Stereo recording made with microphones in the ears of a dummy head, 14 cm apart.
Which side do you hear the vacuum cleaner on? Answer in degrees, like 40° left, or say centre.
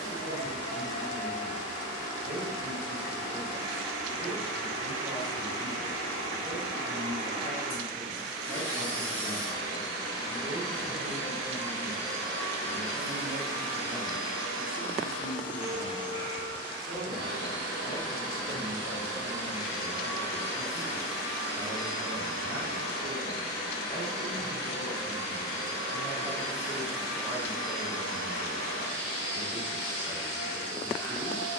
30° left.